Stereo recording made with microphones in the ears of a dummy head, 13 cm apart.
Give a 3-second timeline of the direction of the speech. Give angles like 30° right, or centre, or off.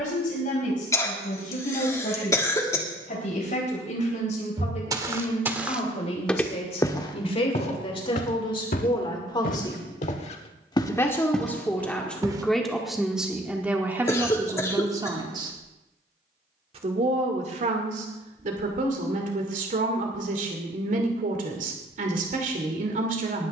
60° left, 50° left, 40° left, 20° left, 10° right, 40° right, 60° right, 60° right.